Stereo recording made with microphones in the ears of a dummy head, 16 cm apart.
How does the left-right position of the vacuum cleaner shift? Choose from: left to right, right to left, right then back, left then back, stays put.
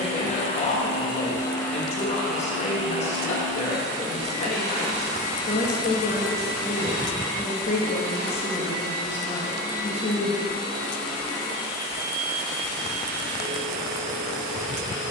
left to right.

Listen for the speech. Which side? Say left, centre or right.
left.